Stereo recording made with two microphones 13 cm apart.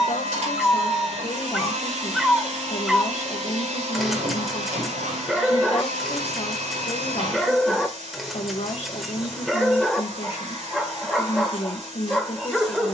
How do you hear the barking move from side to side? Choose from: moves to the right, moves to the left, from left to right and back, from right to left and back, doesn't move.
doesn't move.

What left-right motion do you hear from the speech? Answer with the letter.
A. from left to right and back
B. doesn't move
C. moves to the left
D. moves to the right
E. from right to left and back
B.